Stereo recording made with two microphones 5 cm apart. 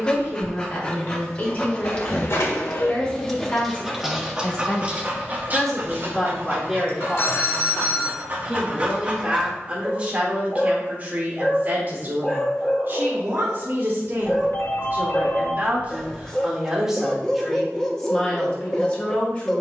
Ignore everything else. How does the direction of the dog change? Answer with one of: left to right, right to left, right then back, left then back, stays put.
right then back.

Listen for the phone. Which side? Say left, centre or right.
left.